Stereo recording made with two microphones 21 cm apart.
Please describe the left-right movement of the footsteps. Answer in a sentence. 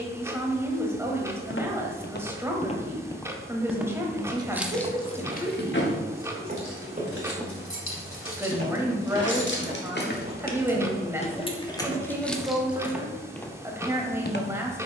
You can hear the footsteps go right and come back.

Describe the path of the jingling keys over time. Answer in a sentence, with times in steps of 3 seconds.
In this clip you hear the jingling keys not at all from 0 s, on the left from 3 s and in the centre from 12 s.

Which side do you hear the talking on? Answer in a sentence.
You can hear the talking in the centre.